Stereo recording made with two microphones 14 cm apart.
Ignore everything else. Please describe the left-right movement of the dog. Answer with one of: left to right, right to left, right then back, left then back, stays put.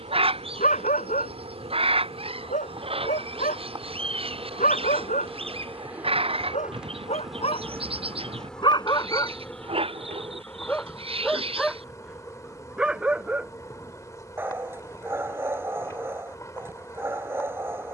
left to right.